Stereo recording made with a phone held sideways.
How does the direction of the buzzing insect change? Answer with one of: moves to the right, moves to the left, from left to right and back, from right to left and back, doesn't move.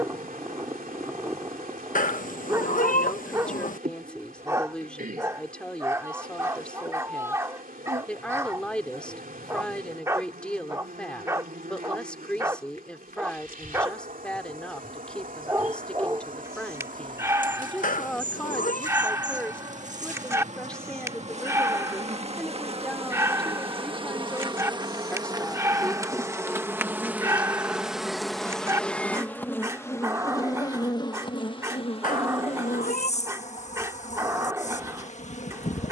moves to the left.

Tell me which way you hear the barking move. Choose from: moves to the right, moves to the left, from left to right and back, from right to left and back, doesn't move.
doesn't move.